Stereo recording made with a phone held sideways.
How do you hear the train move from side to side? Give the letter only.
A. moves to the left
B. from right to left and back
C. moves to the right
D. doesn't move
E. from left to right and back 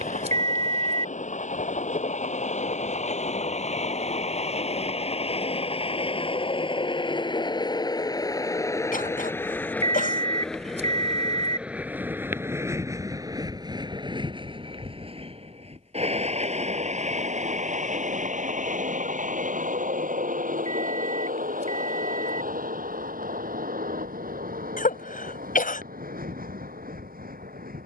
C.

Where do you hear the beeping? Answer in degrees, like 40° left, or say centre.
50° right.